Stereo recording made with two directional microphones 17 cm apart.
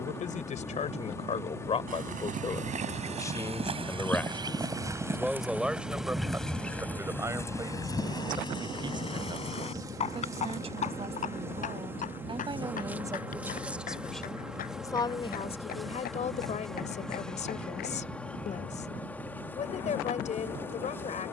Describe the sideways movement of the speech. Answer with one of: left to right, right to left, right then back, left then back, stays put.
right then back.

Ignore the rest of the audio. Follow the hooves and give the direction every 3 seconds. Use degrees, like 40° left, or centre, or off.
50° right, 20° right, 20° left, 40° left, 50° left, 60° left, off.